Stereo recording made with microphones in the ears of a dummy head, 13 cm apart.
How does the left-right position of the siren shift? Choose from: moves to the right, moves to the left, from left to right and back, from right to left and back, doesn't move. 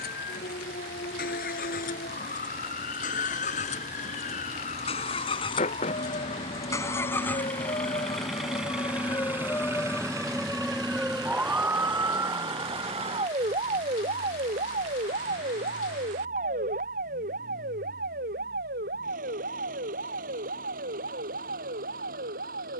moves to the right.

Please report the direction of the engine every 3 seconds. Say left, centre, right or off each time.
left, left, centre, right, right, right, right, right.